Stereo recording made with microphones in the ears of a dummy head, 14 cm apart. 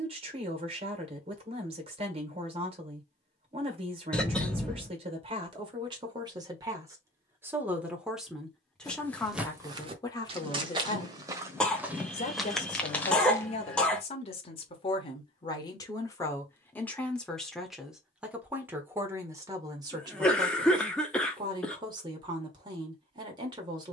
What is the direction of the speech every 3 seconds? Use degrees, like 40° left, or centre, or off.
40° right, 40° right, 10° right, 20° left, 40° left, 10° left, 20° right, 30° right.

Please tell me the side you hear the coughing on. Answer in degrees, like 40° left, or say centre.
10° left.